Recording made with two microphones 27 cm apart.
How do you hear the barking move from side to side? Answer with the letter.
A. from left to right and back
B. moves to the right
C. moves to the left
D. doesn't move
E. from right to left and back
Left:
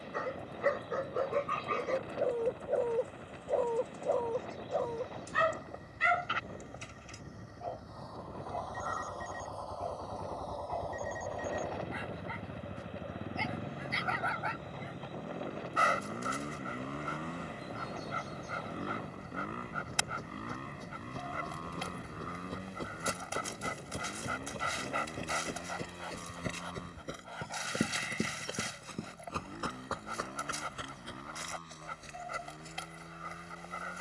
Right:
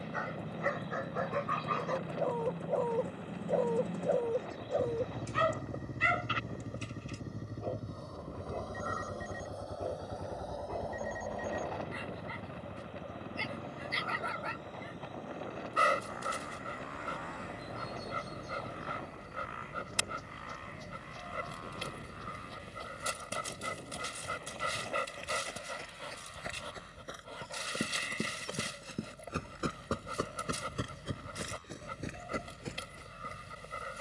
B.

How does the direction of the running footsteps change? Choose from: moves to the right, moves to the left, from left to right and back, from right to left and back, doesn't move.
moves to the right.